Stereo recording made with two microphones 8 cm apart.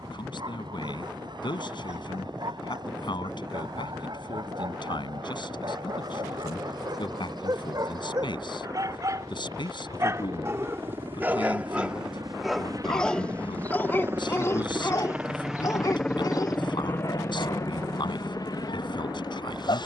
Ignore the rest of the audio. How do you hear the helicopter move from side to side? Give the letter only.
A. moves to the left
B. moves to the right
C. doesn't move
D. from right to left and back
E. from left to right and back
A.